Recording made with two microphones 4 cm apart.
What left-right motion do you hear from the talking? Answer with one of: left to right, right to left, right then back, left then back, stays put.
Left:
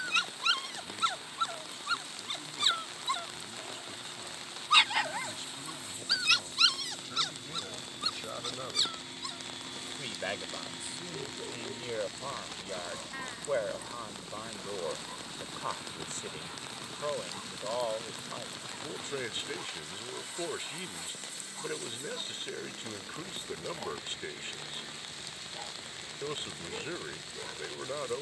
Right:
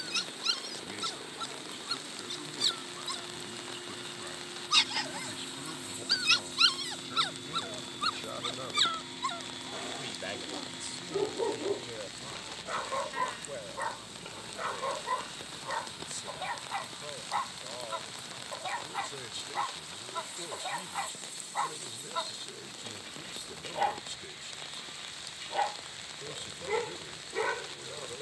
right to left.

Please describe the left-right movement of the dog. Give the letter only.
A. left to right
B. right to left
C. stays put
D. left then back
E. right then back
A.